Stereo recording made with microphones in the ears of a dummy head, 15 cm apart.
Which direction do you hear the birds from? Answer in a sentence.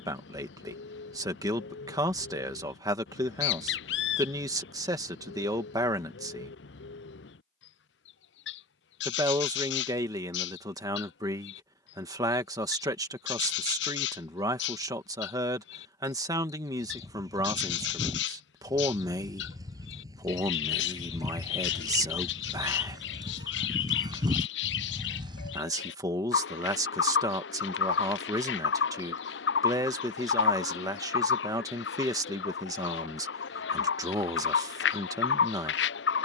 You can hear the birds on the left.